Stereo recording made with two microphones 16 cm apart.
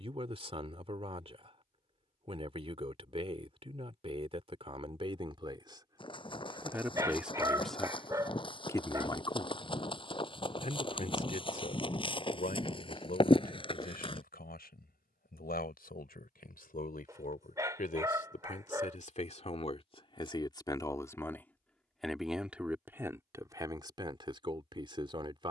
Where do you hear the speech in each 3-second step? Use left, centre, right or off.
right, right, centre, left, left, left, left, centre, right.